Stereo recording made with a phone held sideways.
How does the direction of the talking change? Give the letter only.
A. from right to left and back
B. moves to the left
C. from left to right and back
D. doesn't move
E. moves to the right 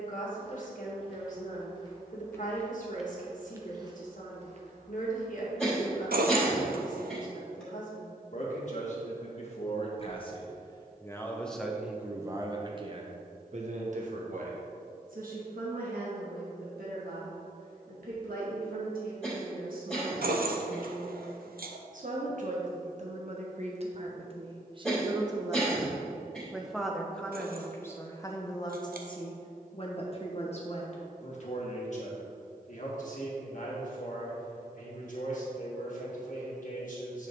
C.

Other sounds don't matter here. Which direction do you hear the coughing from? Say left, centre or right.
centre.